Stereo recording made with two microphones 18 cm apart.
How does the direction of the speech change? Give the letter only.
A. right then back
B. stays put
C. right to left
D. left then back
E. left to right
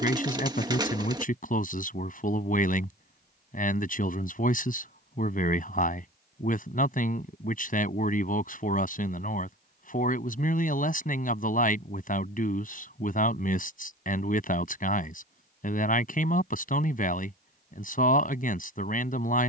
B.